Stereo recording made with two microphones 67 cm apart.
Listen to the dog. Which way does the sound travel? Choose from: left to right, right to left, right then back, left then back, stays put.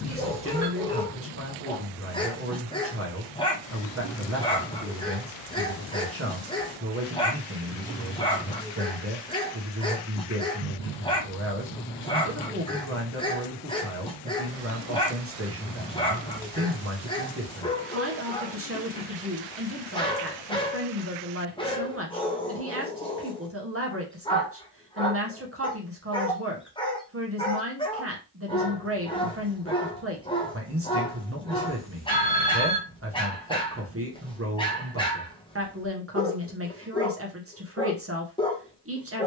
stays put.